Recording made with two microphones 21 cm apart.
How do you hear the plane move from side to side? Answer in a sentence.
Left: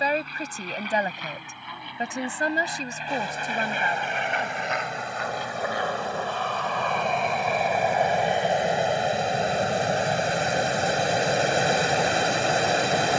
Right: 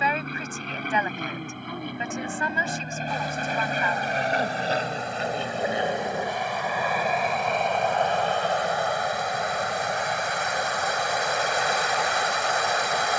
In this clip you hear the plane move from right to left.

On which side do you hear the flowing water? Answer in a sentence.
In this clip you hear the flowing water on the left.